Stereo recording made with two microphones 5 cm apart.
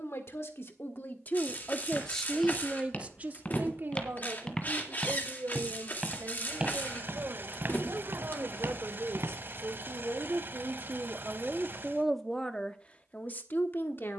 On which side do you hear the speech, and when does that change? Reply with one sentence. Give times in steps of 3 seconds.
You can hear the speech on the left from 0 s, on the right from 3 s and on the left from 12 s.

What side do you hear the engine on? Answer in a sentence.
You can hear the engine on the right.